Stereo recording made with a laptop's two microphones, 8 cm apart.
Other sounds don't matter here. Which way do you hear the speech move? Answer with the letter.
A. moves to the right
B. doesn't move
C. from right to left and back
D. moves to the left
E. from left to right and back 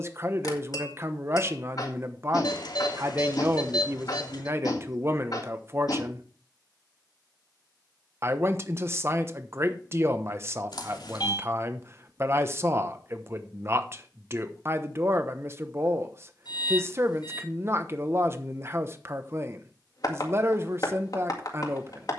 B.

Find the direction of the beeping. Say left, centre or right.
left.